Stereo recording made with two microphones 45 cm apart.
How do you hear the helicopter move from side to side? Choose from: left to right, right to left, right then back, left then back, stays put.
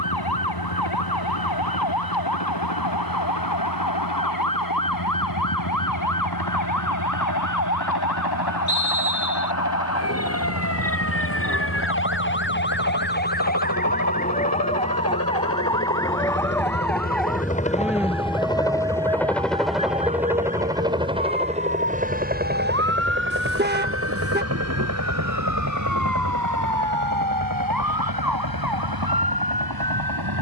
left to right.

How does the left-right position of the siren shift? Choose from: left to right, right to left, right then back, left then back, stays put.
left to right.